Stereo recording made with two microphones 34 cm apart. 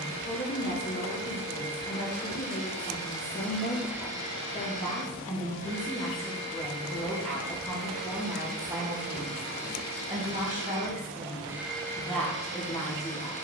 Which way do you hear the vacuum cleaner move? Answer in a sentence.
In this clip you hear the vacuum cleaner move from left to right and back again.